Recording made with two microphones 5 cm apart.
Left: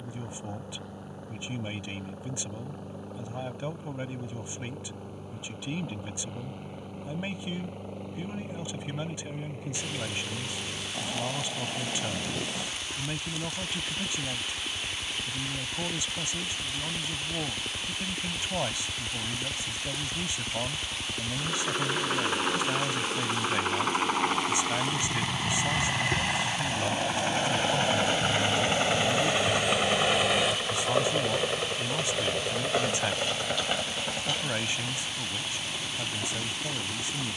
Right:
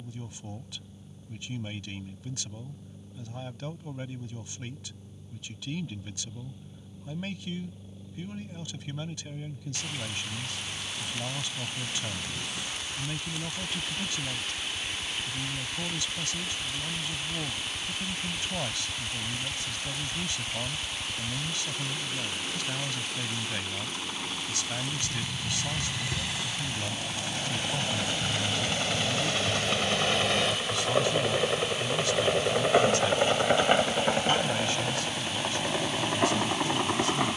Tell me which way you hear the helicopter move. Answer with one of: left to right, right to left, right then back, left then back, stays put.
left to right.